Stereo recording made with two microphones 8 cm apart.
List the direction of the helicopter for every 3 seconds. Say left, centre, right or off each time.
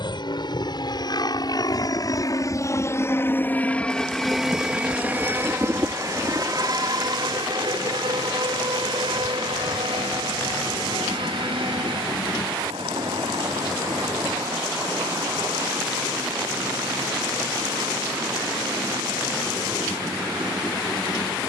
left, centre, right, right, right, right, right.